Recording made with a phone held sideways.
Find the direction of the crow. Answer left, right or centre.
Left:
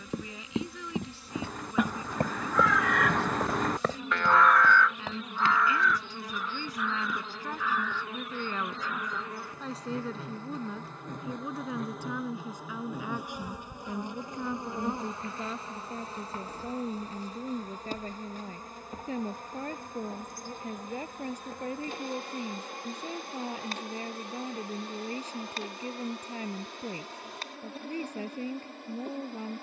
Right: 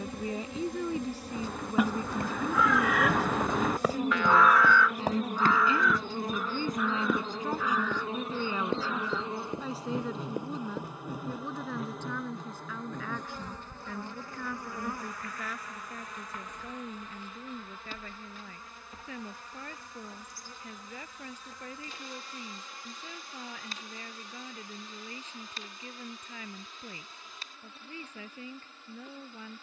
centre.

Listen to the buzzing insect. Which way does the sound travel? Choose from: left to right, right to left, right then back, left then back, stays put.
right to left.